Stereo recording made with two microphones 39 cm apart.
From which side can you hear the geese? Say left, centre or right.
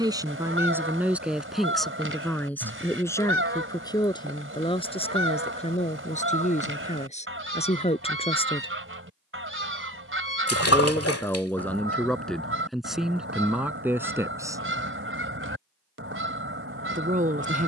right.